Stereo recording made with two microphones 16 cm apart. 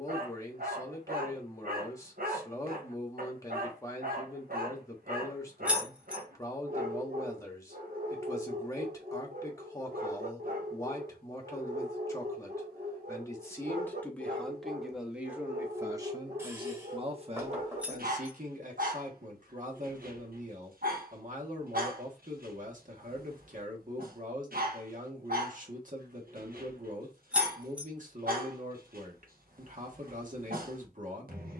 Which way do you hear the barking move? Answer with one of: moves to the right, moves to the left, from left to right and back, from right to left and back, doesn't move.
doesn't move.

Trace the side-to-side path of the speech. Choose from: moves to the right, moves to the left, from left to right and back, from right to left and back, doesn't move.
moves to the right.